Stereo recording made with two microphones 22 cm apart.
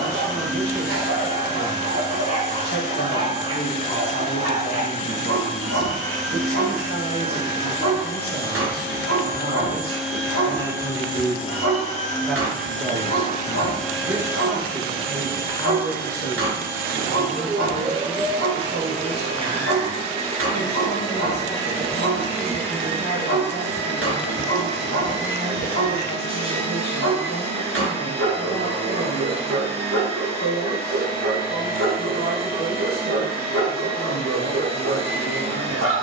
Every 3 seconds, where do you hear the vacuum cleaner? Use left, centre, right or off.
right, right, right, centre, centre, right, right, right, right, right, right, right.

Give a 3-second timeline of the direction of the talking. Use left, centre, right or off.
left, left, left, left, centre, left, left, left, left, left, left, left.